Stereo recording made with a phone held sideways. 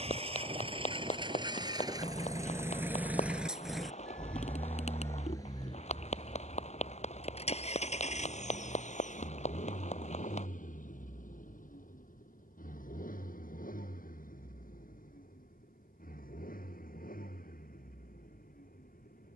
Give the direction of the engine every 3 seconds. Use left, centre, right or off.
right, centre, left, left, left, left, left.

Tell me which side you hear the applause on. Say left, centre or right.
left.